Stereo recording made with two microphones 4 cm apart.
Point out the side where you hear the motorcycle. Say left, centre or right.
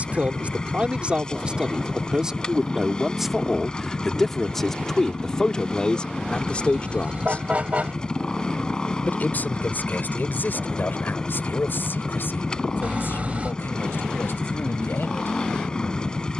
left.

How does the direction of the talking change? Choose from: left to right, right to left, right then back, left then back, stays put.
right to left.